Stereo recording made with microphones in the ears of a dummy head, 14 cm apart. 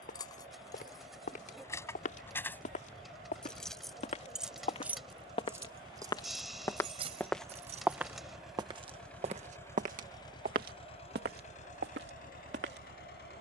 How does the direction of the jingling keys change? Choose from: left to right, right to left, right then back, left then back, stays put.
left to right.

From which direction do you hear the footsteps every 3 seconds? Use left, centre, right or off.
left, left, centre, right, right.